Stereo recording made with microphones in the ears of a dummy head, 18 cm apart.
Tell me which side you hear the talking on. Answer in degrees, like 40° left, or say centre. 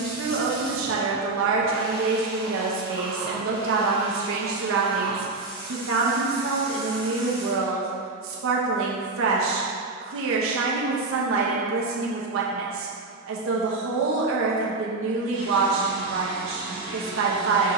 70° right.